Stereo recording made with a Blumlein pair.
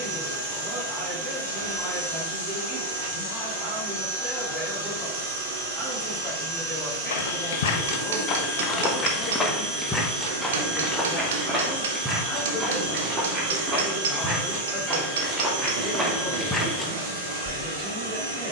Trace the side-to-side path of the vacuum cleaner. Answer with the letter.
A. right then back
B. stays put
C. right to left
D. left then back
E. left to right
B.